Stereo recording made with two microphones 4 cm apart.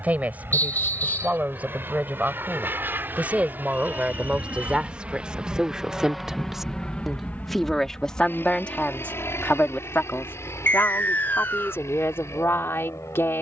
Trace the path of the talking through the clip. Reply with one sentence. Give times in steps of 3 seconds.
You can hear the talking on the right from 0 s, in the centre from 6 s and on the left from 9 s.